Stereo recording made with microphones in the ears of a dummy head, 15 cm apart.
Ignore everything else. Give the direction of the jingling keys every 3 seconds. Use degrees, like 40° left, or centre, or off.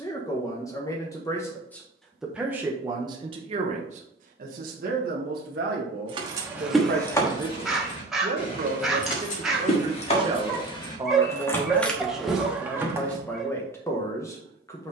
off, off, 20° left, 30° left, 10° right.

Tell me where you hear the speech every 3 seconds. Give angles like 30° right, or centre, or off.
10° left, 50° right, 50° right, 20° right, 10° left.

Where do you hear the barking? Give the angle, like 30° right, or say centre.
centre.